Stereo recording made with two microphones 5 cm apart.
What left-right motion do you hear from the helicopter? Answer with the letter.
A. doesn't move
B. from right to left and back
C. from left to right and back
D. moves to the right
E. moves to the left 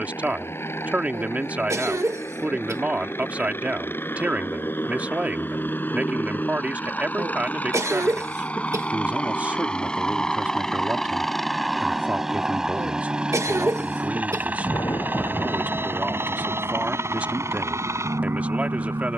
D.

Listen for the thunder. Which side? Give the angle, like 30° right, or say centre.
70° left.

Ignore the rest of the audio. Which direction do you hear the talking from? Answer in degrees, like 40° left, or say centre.
30° right.